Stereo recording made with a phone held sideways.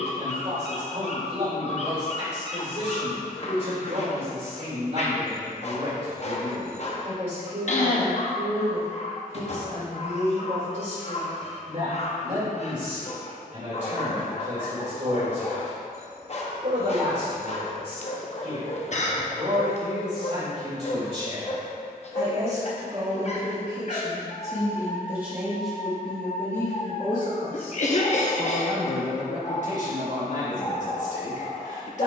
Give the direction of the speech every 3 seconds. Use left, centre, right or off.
right, right, right, right, right, right, right, right, centre, left, left.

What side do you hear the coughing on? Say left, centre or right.
left.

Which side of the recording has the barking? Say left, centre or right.
left.